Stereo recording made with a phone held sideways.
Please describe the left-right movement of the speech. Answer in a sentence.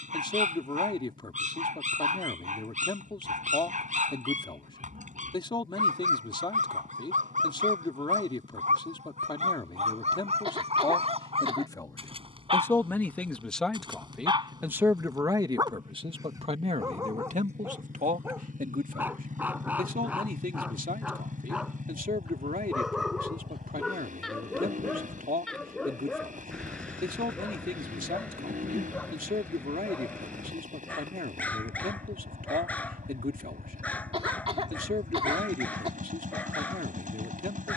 You can hear the speech move from left to right.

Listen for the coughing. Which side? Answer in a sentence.
You can hear the coughing on the right.